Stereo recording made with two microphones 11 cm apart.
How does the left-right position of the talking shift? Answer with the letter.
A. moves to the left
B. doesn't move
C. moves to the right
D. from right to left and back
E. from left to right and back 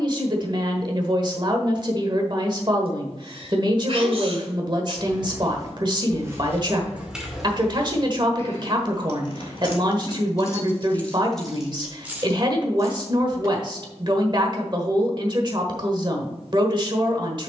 B.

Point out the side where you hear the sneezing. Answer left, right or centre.
right.